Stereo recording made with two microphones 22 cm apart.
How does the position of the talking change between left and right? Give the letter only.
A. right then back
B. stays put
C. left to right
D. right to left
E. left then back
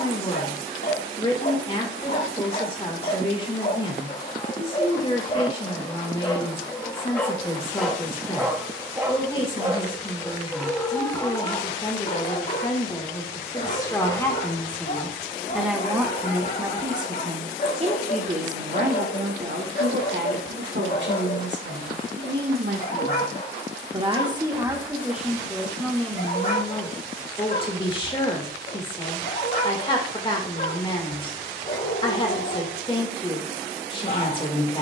A.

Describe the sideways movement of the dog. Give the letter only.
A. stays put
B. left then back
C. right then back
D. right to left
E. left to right
C.